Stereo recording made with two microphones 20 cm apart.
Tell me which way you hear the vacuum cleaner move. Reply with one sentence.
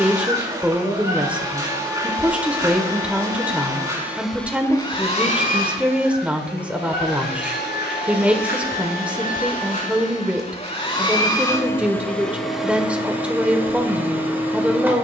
In this clip you hear the vacuum cleaner move from right to left and back again.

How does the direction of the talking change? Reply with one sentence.
In this clip you hear the talking stay in one place.